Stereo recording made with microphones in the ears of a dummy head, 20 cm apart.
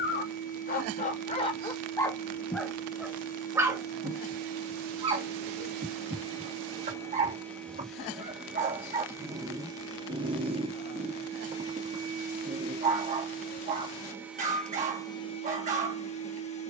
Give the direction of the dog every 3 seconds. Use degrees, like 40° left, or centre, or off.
30° left, 20° right, 40° right, 40° right, 40° right, 40° right.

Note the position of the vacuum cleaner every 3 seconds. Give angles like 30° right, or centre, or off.
40° left, 30° left, 10° left, 30° right, 20° right, 30° left.